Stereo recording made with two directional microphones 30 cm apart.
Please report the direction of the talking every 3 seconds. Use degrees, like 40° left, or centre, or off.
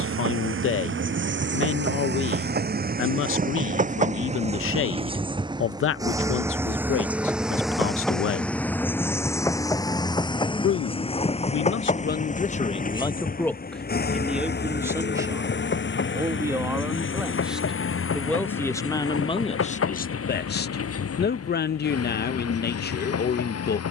40° left, 40° left, 40° left, 40° left, 10° left, 10° right, 20° left, 30° left.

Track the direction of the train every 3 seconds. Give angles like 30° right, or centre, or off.
40° right, 20° right, centre, 20° left, 30° left, 40° left, 50° left, 50° left.